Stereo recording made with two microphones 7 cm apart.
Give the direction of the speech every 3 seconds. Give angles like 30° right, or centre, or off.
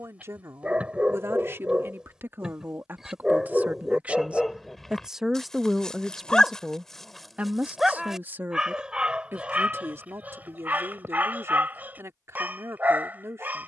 40° right, 10° right, 20° right, 40° right, 40° right.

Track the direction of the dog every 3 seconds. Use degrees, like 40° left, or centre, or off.
10° right, centre, centre, 20° right, 20° right.